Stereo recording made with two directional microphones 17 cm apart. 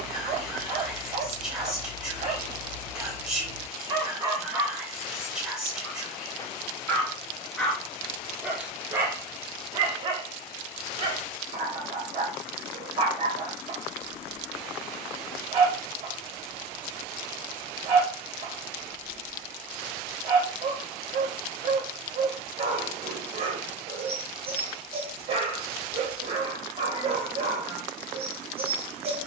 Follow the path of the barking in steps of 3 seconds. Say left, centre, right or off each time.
right, right, centre, right, right, right, right, right, right, right.